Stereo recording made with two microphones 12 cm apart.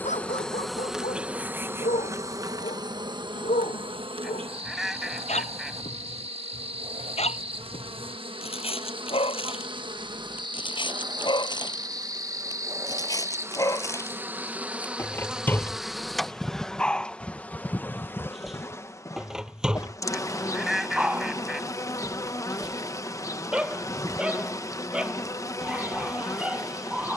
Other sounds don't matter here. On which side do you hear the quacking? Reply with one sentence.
In this clip you hear the quacking in the centre.